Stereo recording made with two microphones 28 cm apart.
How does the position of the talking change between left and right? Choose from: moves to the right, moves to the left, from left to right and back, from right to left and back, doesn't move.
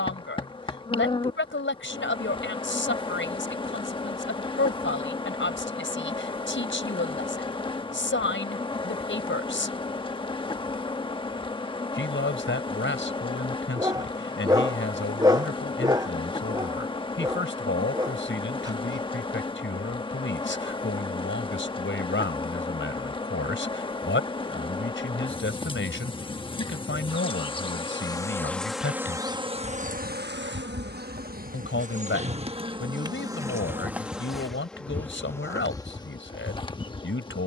doesn't move.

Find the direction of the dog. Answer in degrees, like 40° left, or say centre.
10° right.